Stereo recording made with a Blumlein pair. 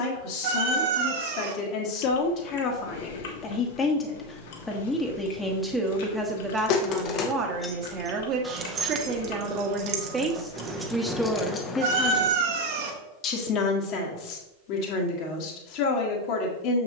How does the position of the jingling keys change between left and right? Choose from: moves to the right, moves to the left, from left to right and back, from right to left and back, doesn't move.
from left to right and back.